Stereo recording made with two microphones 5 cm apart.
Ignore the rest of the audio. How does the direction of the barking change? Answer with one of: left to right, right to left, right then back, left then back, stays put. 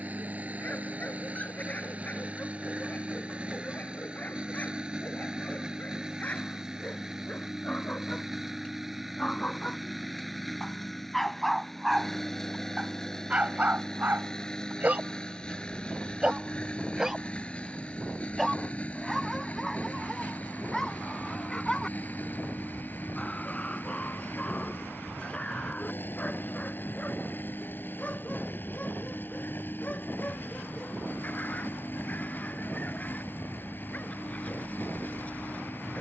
right then back.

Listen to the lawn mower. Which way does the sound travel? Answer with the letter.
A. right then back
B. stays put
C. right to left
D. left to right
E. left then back
C.